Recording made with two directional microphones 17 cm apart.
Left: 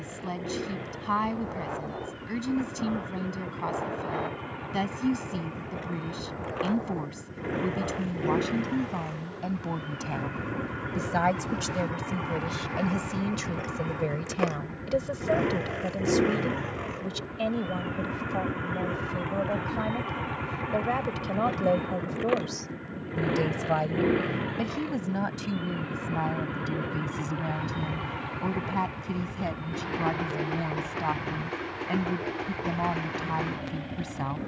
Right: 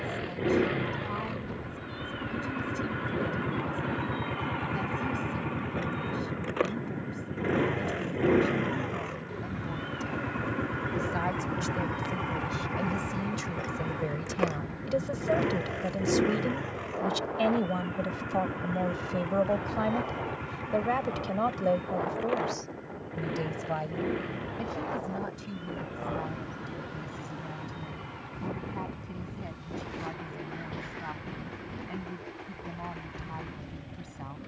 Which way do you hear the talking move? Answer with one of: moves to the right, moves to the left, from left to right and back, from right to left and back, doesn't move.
from left to right and back.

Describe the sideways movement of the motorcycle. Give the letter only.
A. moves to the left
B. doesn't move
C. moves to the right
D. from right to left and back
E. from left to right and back
A.